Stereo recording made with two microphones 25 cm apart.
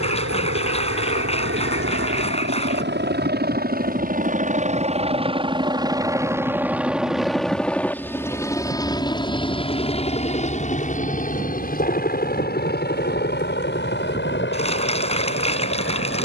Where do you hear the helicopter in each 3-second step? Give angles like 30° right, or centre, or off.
50° right, 30° right, centre, 30° left, 40° left, 50° left.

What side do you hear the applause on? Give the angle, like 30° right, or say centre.
20° left.